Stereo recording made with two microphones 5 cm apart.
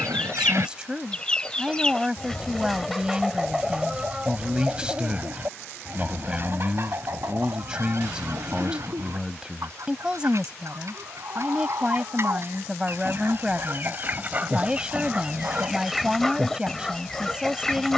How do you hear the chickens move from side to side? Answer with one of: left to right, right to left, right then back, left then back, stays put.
right then back.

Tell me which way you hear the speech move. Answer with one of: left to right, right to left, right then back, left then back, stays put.
stays put.